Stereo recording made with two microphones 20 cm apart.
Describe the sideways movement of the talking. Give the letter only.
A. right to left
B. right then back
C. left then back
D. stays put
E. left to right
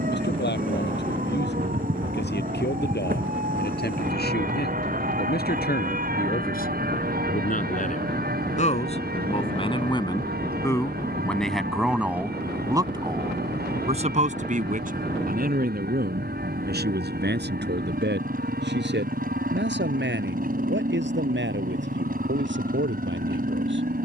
E.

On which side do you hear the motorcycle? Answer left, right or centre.
right.